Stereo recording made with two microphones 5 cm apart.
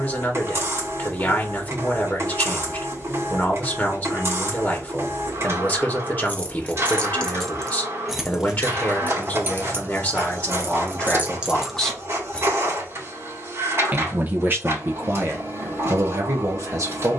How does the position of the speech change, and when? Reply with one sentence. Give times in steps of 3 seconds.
In this clip you hear the speech on the left from 0 s and on the right from 12 s.